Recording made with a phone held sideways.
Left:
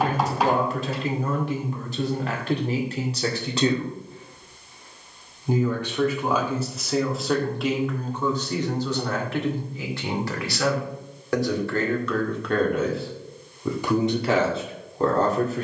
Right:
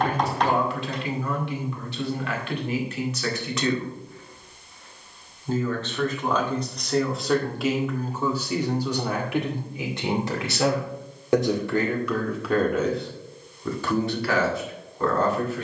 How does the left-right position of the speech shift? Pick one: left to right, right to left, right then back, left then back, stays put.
right then back.